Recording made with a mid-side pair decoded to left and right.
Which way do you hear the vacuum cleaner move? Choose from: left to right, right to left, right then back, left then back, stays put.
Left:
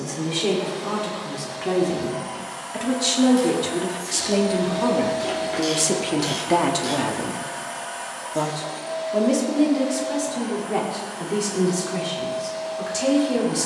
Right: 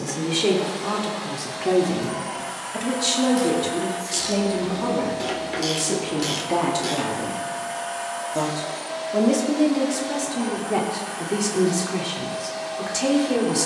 left then back.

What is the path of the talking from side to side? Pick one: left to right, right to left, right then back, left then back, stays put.
left then back.